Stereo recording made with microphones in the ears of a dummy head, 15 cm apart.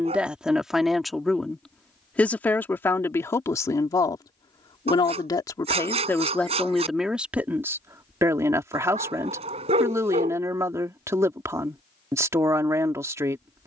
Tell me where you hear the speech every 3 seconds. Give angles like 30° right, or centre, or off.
centre, 20° left, 10° right, 20° right, 20° right.